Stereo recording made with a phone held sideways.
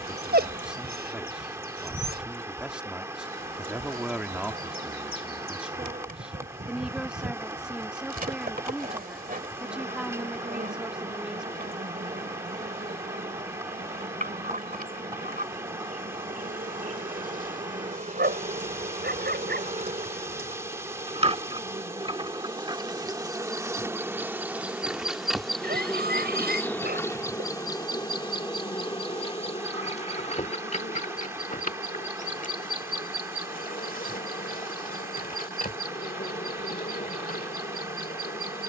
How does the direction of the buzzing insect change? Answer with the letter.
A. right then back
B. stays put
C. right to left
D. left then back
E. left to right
C.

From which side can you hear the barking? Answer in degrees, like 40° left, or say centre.
80° right.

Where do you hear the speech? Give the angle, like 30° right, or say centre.
10° right.